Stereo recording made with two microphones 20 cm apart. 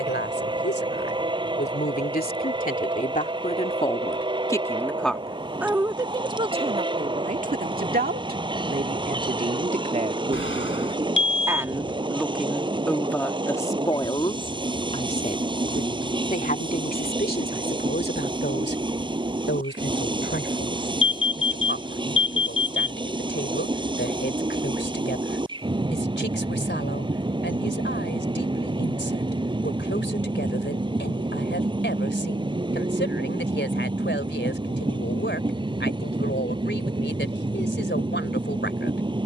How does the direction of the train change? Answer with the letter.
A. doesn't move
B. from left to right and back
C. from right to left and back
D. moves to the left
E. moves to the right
A.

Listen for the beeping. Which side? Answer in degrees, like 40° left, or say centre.
80° left.